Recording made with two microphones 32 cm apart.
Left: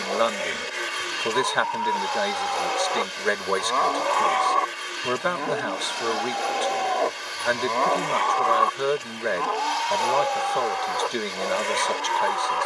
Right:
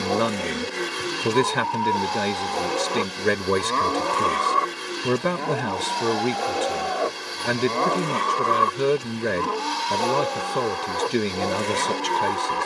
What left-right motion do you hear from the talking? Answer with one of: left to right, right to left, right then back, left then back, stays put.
stays put.